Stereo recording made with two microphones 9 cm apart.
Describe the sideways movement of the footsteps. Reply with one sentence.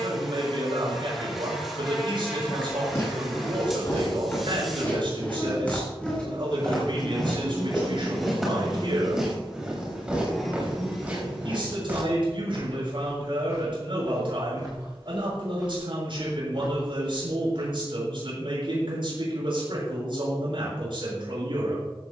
You can hear the footsteps travel towards the right.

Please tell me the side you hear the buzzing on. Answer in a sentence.
You can hear the buzzing in the centre.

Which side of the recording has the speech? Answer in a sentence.
You can hear the speech on the right.